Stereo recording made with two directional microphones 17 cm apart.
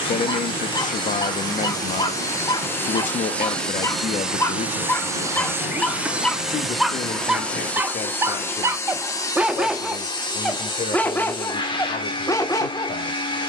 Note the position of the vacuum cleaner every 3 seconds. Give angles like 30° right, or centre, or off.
20° left, centre, 10° left, 30° left, 30° left.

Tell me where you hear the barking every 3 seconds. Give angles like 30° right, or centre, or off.
30° left, 10° left, 10° right, centre, 20° left.